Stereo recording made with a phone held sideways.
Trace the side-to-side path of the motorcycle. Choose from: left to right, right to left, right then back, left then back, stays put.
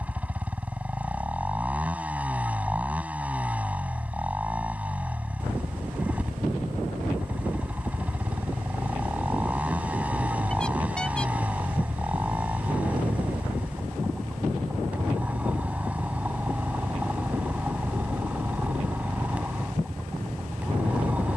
stays put.